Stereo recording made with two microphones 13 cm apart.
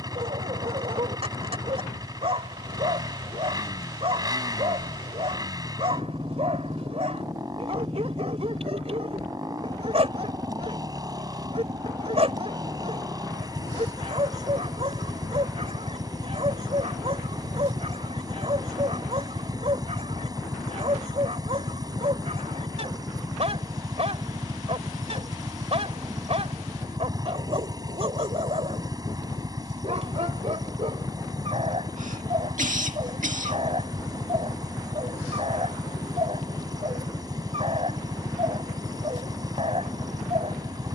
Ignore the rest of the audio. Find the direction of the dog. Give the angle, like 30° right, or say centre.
50° right.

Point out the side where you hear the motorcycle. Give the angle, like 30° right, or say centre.
30° right.